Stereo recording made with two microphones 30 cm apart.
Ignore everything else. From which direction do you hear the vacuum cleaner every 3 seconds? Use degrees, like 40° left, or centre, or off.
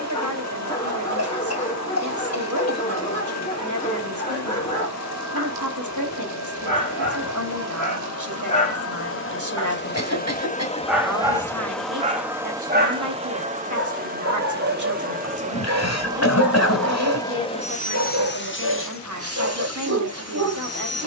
60° left, 60° left, 60° left, 20° left, 20° right, centre, 50° left.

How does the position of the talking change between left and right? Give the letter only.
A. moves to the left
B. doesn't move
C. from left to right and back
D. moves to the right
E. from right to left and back
B.